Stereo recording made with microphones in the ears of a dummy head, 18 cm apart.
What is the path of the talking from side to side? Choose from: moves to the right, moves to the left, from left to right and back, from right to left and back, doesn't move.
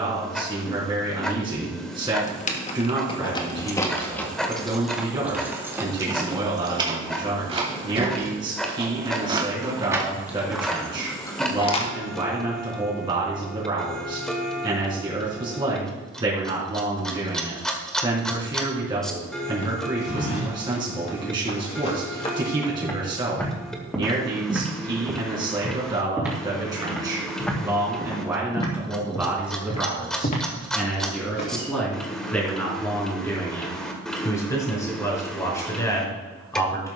moves to the left.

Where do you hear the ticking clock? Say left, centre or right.
centre.